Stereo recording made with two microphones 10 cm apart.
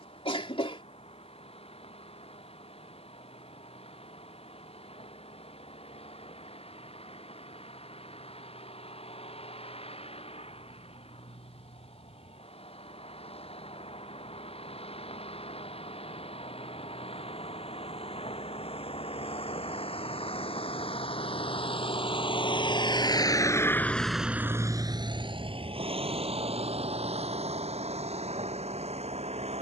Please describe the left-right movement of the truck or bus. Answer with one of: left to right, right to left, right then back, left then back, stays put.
left to right.